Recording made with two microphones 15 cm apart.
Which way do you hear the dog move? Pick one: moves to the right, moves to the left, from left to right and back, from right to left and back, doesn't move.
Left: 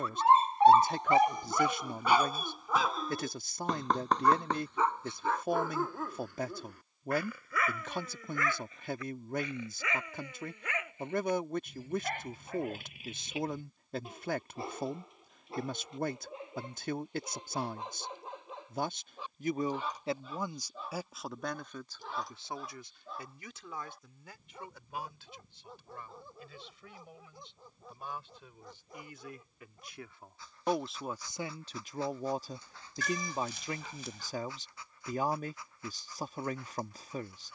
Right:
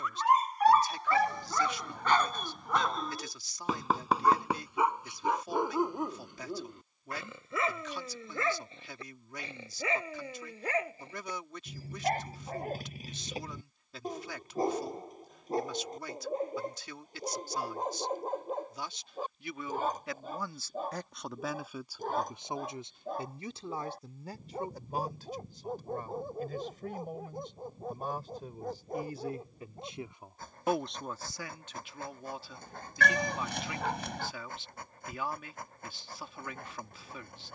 moves to the right.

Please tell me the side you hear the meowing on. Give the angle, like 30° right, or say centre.
70° right.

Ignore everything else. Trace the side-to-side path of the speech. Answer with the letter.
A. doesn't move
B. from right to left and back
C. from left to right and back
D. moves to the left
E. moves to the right
C.